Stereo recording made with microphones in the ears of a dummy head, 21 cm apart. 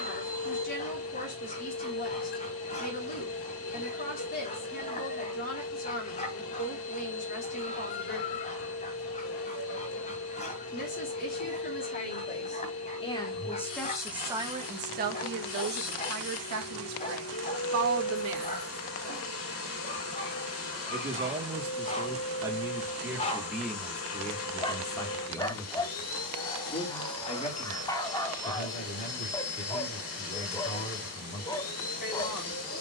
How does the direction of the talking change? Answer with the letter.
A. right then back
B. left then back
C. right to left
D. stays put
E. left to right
A.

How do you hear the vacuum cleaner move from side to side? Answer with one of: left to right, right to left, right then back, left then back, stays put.
stays put.